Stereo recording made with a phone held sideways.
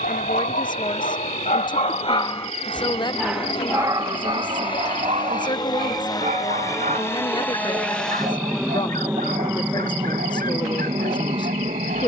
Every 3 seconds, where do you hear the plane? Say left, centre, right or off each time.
left, left, centre, right.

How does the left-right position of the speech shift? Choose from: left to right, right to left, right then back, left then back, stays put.
stays put.